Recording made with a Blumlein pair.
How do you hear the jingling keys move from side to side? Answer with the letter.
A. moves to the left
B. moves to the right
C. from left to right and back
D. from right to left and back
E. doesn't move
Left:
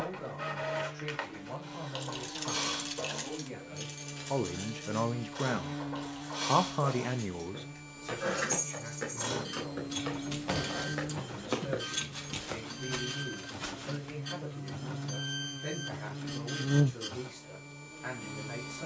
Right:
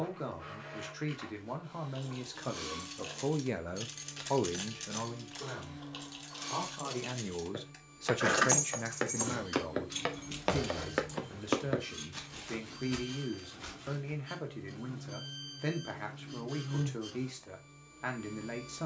C.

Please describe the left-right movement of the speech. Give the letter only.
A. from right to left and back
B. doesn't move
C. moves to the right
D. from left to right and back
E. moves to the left
A.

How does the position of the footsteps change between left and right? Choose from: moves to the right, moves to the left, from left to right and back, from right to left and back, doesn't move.
moves to the left.